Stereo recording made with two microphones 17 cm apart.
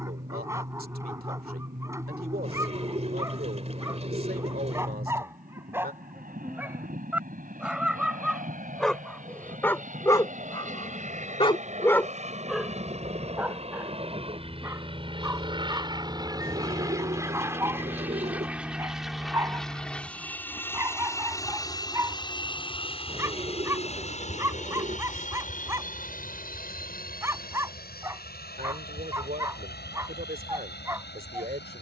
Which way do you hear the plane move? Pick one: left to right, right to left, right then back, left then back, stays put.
right to left.